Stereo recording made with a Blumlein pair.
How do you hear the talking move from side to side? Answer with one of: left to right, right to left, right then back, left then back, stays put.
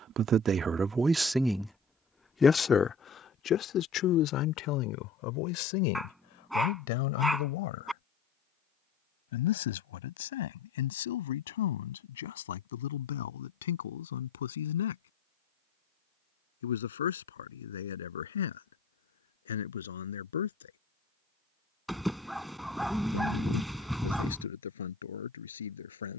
right to left.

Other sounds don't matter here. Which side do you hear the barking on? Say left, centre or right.
centre.